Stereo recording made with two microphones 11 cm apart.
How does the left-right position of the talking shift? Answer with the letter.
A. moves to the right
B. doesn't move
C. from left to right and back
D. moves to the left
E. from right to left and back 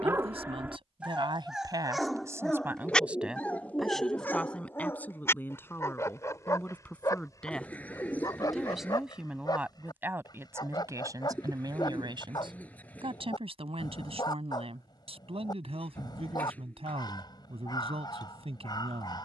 E.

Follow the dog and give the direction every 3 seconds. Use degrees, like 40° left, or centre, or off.
10° right, 20° left, 30° left, 40° left, 40° left, 40° left, 40° left.